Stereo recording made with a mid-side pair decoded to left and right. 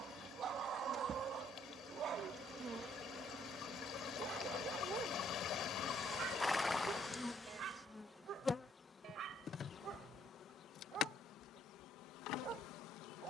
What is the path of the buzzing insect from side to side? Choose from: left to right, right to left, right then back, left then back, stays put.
right to left.